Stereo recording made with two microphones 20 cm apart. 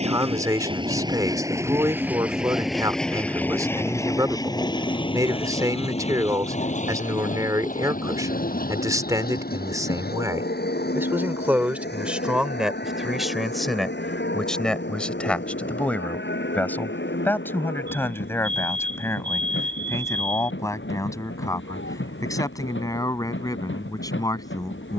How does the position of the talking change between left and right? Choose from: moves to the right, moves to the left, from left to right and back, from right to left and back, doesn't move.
moves to the left.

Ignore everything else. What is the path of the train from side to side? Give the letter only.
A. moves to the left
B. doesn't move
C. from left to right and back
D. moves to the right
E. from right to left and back
A.